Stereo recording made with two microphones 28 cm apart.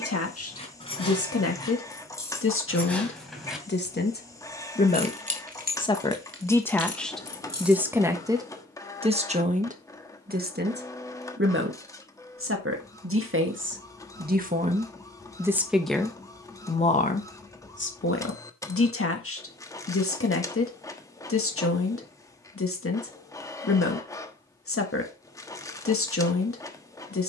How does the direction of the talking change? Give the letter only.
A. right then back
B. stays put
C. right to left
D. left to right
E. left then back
A.